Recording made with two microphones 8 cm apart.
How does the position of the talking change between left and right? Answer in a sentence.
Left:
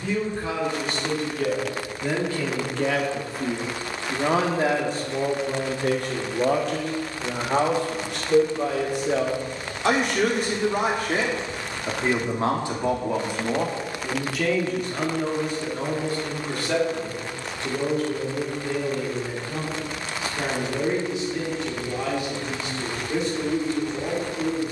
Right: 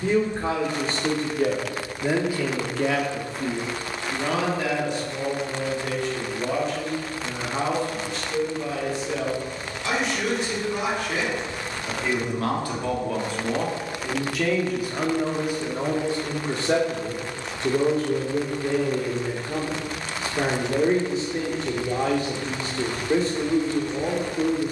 In this clip you hear the talking move from right to left and back again.